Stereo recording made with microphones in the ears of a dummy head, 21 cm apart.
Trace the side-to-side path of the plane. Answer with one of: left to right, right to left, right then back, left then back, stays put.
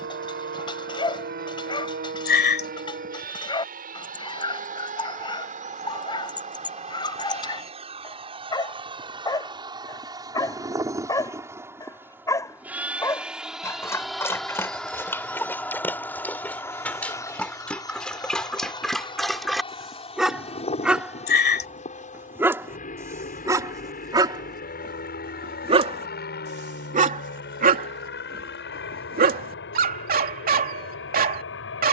right to left.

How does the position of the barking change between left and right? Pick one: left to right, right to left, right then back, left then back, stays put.
left to right.